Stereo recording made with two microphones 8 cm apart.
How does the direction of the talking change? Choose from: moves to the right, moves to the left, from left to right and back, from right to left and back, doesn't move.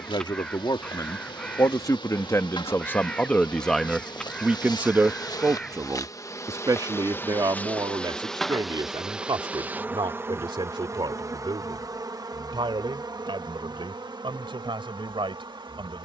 moves to the right.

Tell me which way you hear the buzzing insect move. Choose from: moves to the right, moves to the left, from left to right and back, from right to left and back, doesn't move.
moves to the right.